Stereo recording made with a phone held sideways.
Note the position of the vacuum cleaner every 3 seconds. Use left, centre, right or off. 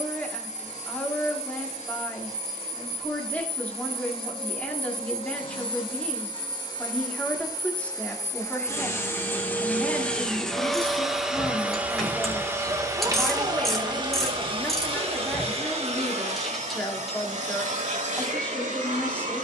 left, left, left, centre, right, right, right.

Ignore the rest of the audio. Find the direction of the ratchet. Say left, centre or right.
centre.